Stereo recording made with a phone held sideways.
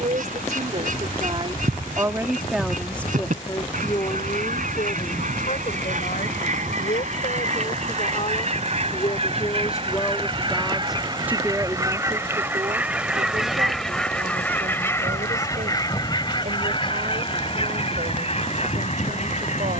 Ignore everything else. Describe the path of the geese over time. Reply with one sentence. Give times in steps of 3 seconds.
In this clip you hear the geese on the right from 0 s, in the centre from 12 s and on the left from 15 s.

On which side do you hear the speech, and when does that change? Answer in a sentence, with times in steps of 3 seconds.
In this clip you hear the speech on the right from 0 s, on the left from 3 s, in the centre from 9 s and on the right from 12 s.